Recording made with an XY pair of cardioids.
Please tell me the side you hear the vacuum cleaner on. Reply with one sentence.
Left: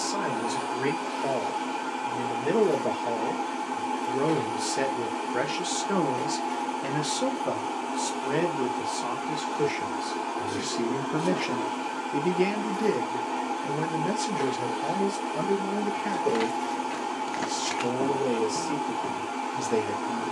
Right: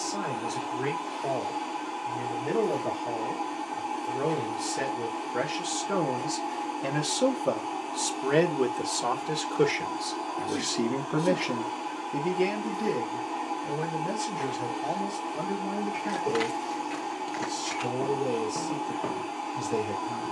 In this clip you hear the vacuum cleaner on the left.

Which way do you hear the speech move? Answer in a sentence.
You can hear the speech move from left to right and back again.